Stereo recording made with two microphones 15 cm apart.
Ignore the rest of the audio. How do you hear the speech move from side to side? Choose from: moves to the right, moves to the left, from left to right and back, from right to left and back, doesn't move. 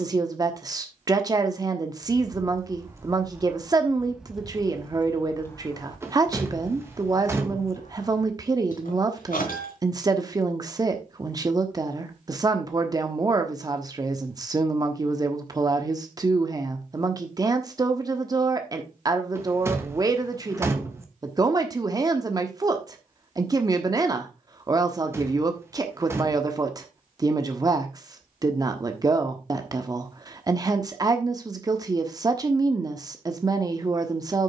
doesn't move.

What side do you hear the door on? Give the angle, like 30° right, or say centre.
20° right.